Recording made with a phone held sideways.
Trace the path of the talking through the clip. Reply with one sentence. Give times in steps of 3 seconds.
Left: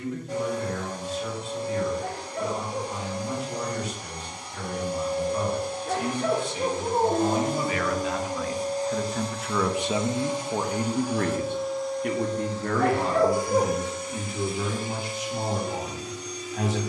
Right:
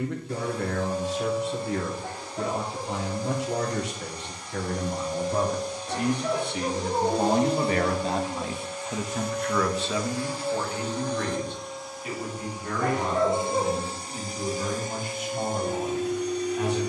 In this clip you hear the talking on the right from 0 s and on the left from 9 s.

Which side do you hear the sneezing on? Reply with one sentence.
In this clip you hear the sneezing on the left.